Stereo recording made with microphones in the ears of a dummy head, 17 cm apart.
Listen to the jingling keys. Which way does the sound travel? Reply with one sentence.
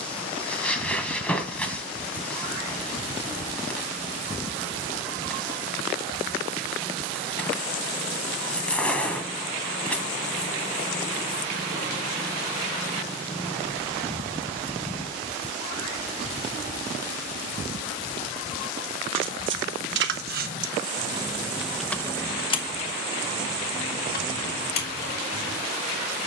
You can hear the jingling keys move to the left.